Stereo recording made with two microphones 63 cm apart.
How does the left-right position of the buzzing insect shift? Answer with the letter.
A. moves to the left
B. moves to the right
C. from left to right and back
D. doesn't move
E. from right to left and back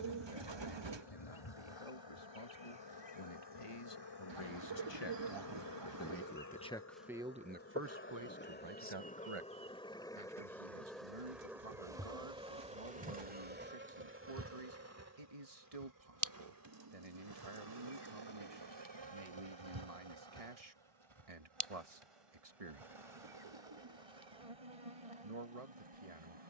B.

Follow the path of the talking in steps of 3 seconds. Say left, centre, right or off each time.
left, left, centre, right, right, right, right, right, right.